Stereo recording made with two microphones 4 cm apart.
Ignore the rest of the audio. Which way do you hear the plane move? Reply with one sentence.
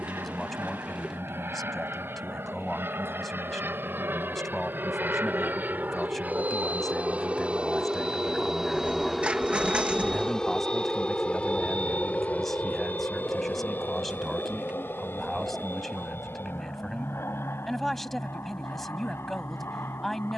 In this clip you hear the plane travel towards the left.